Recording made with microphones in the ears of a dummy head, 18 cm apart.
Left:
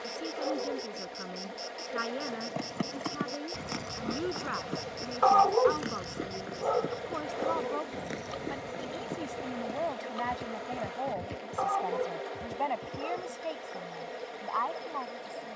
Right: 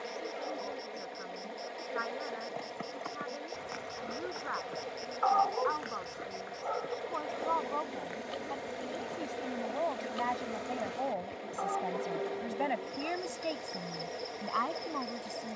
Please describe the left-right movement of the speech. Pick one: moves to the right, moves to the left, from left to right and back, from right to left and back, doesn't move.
moves to the right.